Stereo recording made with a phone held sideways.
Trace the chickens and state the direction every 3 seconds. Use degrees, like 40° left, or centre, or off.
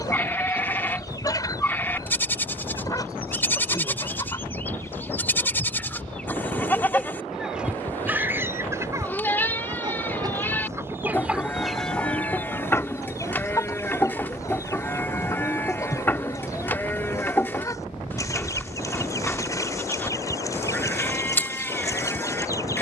30° left, 20° left, 10° right, 20° right, 20° left, 20° left, 20° left, 20° left.